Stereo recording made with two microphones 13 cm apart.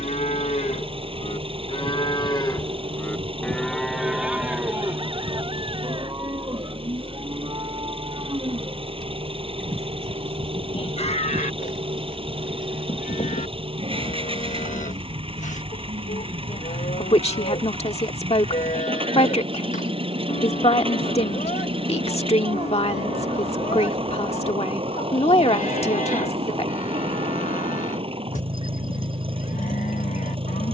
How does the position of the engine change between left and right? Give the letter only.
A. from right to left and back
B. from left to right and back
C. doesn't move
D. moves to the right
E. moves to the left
C.